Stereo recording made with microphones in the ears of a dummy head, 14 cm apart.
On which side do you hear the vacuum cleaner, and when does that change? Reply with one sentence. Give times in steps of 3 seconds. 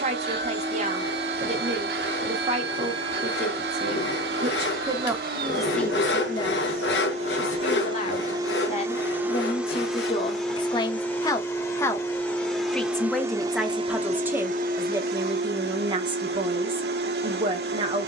In this clip you hear the vacuum cleaner on the right from 0 s, in the centre from 9 s and on the right from 12 s.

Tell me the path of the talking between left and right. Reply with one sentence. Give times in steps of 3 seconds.
You can hear the talking on the right from 0 s, on the left from 6 s, in the centre from 12 s and on the right from 15 s.